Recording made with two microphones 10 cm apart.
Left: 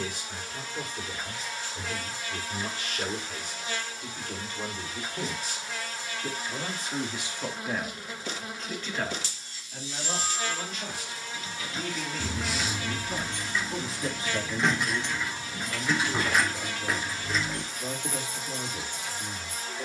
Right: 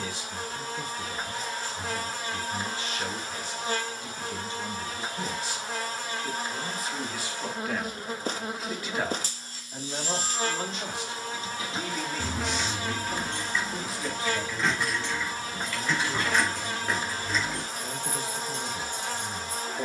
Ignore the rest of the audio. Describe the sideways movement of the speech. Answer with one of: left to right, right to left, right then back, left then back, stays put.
right then back.